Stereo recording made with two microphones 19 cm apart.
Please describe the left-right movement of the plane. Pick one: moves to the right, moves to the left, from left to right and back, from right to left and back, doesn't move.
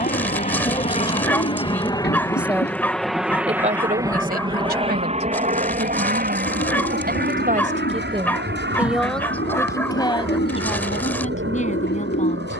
moves to the right.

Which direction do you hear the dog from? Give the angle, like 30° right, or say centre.
10° left.